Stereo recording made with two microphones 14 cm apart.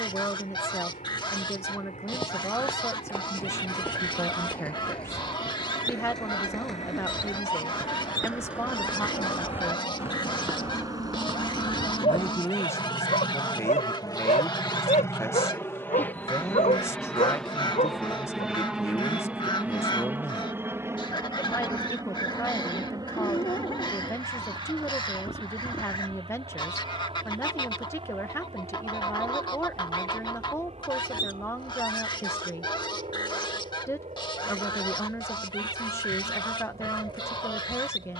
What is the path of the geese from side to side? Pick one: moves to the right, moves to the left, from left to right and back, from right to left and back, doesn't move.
doesn't move.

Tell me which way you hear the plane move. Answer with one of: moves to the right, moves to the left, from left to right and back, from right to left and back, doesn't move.
moves to the right.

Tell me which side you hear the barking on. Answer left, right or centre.
left.